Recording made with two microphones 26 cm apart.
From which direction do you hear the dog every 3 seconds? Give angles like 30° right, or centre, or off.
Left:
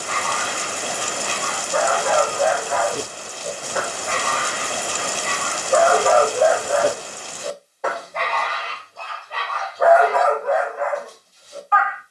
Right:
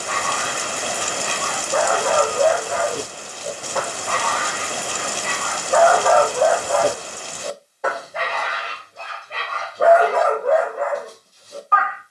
50° right, 30° left, 10° left, 40° right.